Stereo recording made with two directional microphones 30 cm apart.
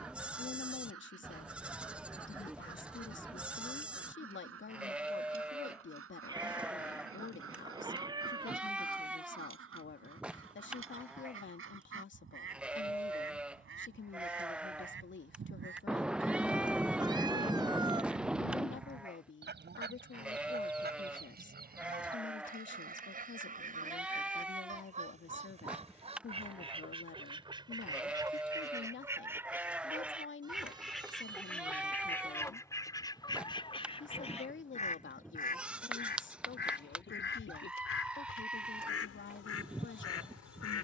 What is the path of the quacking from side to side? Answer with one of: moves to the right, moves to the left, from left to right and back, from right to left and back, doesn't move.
moves to the left.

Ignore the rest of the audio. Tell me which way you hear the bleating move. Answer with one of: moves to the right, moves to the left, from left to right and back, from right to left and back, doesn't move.
doesn't move.